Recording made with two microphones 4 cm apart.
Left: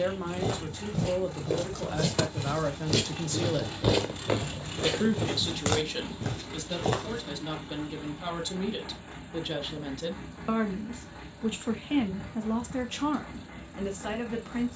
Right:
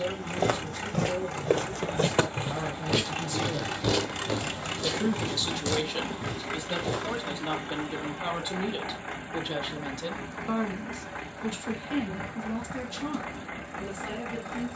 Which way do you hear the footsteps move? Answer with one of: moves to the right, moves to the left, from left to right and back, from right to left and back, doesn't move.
moves to the left.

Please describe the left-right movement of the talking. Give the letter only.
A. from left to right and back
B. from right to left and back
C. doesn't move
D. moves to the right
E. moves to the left
A.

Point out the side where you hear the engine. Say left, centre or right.
right.